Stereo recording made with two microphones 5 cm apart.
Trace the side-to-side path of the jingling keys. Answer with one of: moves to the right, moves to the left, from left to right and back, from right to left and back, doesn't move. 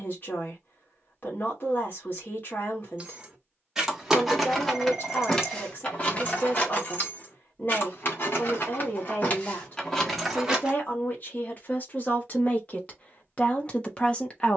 from right to left and back.